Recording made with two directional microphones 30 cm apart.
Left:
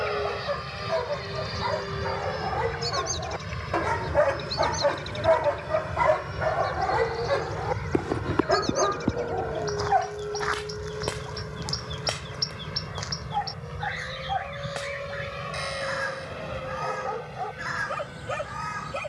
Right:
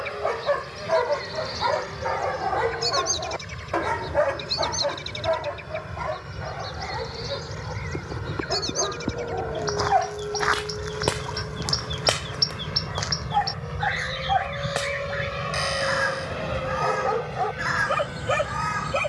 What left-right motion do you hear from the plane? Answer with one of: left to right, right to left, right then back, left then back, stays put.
left to right.